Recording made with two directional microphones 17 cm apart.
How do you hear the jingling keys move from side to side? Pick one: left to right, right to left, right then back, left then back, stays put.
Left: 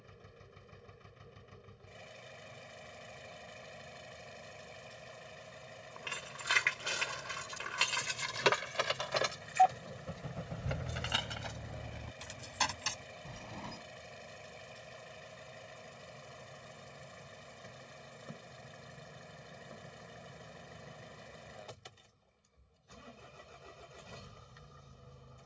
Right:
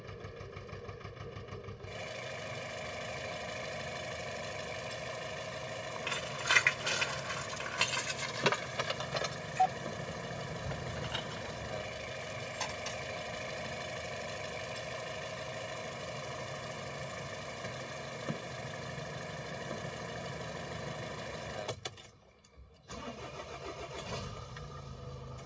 right to left.